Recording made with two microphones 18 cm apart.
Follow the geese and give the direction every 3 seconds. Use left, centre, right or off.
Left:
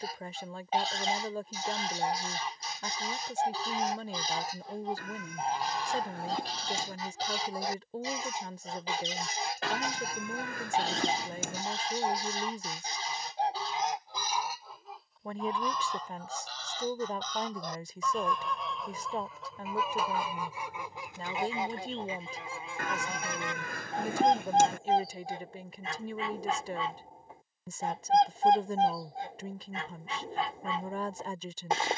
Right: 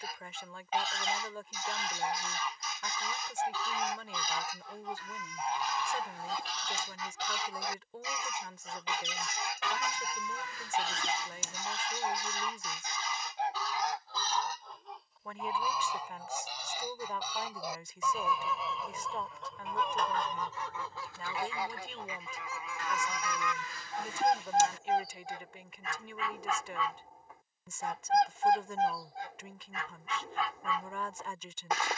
left, left, left, left, left, centre, centre, left, left, left, left.